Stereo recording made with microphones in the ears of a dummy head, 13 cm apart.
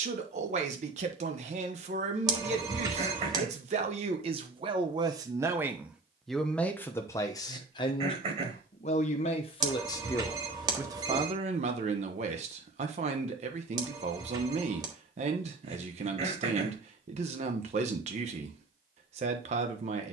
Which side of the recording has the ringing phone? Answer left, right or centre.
right.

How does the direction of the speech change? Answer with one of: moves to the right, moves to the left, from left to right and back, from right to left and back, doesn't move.
from right to left and back.